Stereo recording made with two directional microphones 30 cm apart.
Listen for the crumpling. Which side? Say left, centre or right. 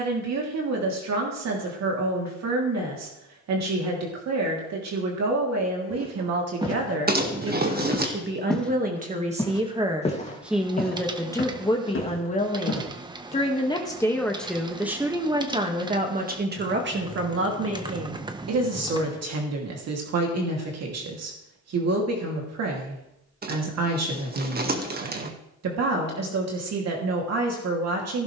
right.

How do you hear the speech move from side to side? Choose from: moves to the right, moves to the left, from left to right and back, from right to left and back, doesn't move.
from right to left and back.